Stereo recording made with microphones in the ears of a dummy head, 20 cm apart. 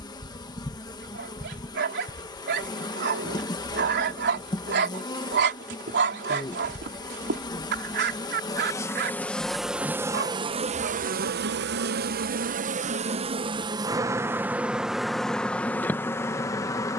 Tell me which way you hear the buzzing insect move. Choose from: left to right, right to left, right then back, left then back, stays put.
right then back.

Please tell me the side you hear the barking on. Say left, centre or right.
right.